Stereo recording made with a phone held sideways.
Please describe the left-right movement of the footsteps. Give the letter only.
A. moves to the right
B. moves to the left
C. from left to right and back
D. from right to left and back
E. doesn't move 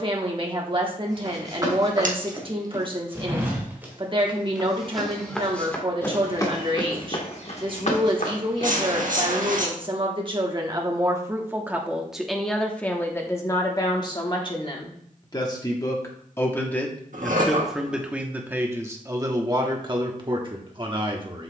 B.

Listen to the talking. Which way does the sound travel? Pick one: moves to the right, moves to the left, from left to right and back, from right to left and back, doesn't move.
from right to left and back.